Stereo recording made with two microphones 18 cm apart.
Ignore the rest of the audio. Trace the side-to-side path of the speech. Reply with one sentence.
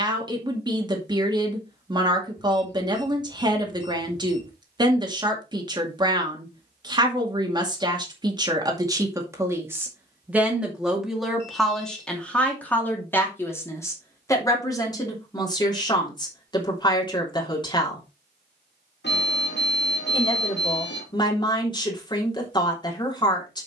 You can hear the speech move from right to left.